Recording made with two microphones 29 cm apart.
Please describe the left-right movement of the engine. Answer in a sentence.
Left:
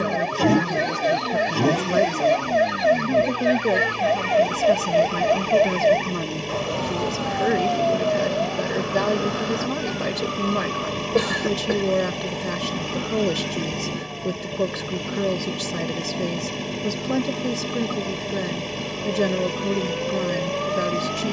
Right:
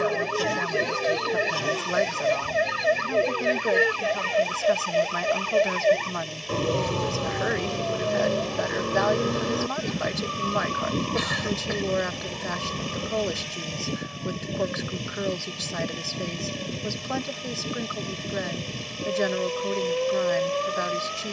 In this clip you hear the engine stay put.